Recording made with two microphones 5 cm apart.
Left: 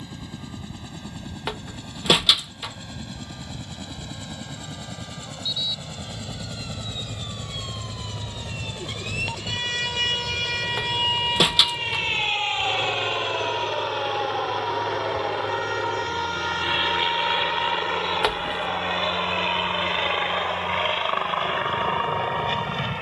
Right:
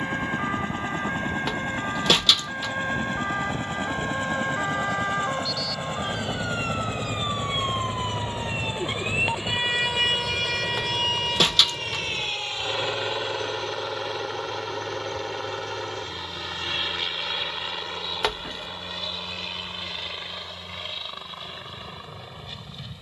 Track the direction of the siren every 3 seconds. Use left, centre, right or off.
right, right, right, centre, left, left, left, left.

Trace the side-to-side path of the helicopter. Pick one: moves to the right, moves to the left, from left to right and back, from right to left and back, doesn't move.
moves to the left.